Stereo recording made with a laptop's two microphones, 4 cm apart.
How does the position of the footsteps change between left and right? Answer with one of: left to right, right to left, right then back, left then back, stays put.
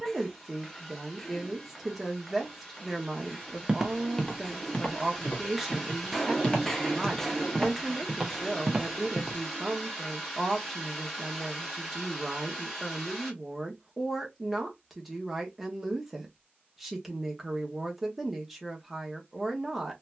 left then back.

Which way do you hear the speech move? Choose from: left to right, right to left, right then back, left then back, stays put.
stays put.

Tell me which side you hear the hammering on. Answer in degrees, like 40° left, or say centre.
10° left.